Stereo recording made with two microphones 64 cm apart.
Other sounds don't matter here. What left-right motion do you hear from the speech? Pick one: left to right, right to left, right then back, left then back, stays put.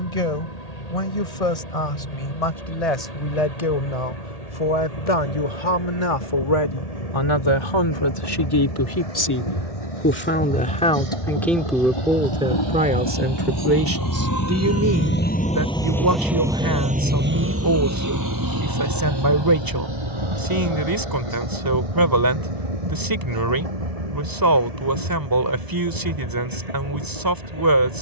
left to right.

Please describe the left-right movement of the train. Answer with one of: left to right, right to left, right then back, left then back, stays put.
left to right.